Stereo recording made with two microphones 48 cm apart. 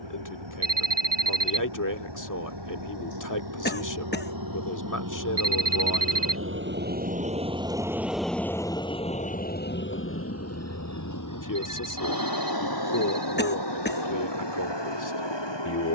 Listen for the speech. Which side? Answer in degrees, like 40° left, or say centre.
40° left.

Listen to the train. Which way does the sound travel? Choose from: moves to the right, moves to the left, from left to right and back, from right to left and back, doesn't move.
moves to the left.